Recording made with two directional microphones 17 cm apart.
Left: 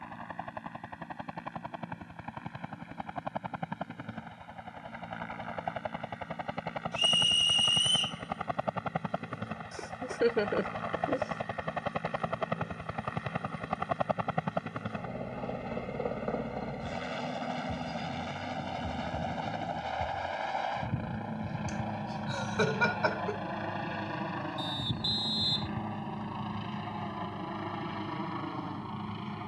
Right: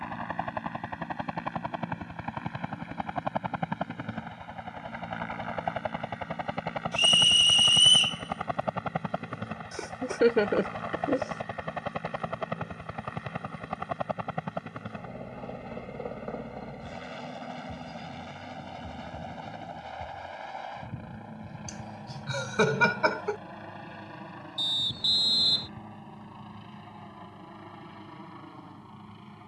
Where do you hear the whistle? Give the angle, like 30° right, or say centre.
40° right.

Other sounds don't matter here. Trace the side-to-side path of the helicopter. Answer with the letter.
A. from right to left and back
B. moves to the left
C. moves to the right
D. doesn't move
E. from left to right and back
B.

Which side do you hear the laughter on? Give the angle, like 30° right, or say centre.
30° right.